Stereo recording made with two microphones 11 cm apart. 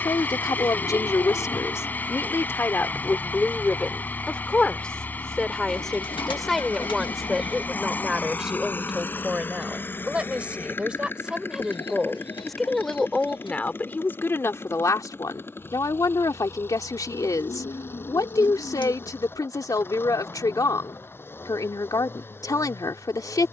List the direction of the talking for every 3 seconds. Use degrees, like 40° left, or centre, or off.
30° left, 10° left, centre, 10° right, 10° left, 30° left, 30° left, 30° left.